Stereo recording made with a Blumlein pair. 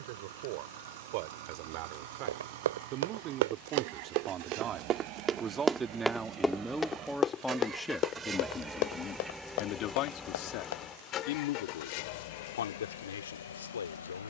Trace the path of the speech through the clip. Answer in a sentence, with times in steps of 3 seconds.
In this clip you hear the speech on the right from 0 s, in the centre from 6 s and on the left from 9 s.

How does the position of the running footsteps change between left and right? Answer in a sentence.
You can hear the running footsteps move from right to left.